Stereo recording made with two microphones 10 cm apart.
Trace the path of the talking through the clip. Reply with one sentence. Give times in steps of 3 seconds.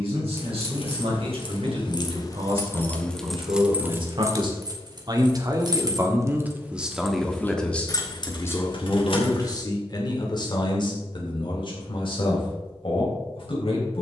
In this clip you hear the talking on the right from 0 s, in the centre from 6 s and on the left from 9 s.